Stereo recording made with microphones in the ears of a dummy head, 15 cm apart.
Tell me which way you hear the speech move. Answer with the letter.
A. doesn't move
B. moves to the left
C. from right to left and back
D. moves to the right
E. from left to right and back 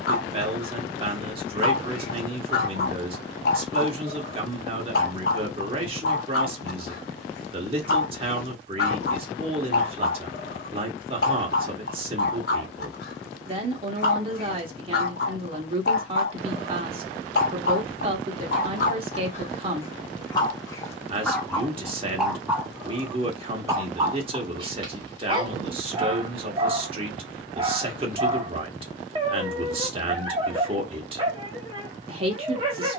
A.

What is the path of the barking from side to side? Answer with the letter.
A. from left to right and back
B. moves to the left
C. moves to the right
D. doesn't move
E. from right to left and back
C.